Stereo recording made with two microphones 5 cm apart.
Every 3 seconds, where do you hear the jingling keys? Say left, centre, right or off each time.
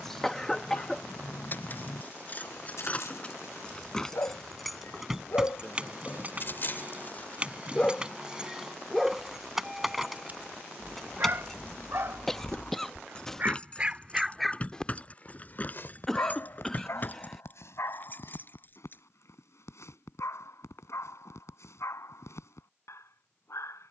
left, centre, right, centre, left, left, left, off.